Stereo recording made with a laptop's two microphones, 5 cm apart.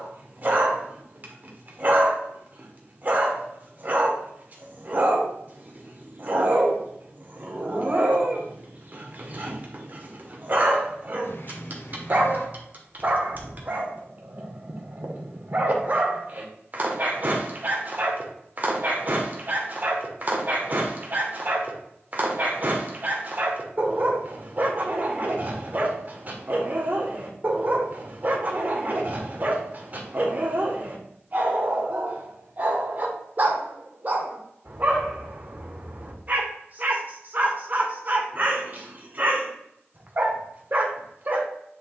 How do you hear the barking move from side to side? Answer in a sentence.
In this clip you hear the barking stay put.